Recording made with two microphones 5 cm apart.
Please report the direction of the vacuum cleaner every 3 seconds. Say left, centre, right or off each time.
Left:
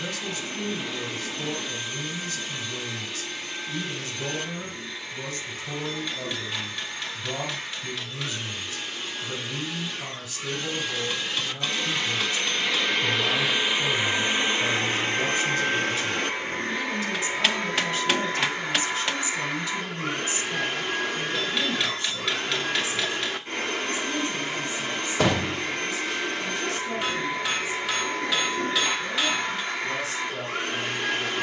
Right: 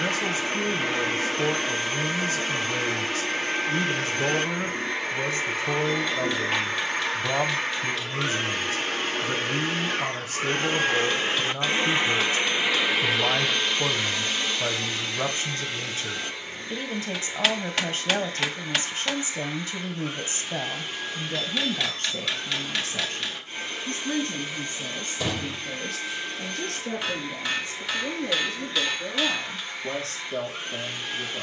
right, right, right, right, centre, left, left, left, left, left, left.